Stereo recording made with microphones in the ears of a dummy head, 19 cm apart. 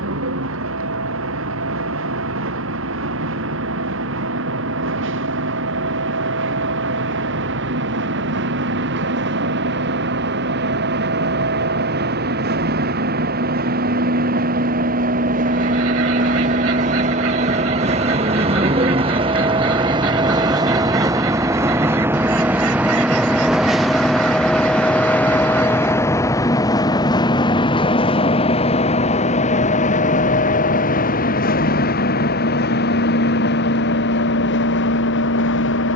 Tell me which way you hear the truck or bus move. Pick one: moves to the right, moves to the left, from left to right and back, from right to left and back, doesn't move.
moves to the left.